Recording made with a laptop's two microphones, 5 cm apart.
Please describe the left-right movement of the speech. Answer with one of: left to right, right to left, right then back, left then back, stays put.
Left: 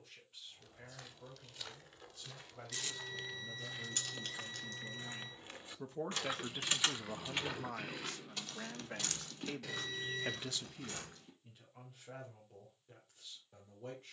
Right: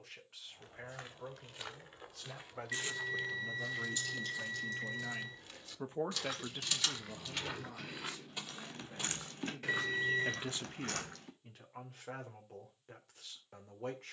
left then back.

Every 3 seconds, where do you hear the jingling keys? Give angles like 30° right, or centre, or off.
off, 50° left, 10° left, 50° right, off.